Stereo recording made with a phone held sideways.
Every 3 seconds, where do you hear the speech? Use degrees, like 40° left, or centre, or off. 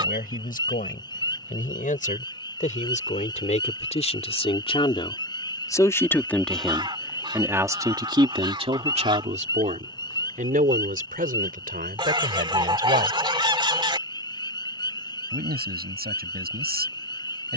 60° left, 40° left, 10° right, 60° right, 70° right, 80° right.